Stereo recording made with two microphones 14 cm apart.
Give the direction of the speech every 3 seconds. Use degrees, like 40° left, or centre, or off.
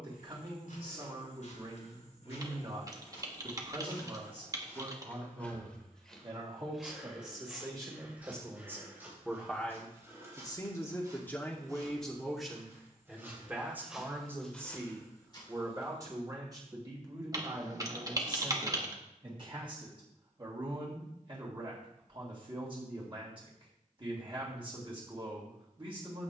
40° right, 40° right, 30° right, 10° left, 10° right, 30° right, 40° right, 40° right, 40° right.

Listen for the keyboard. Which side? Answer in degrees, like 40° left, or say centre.
30° right.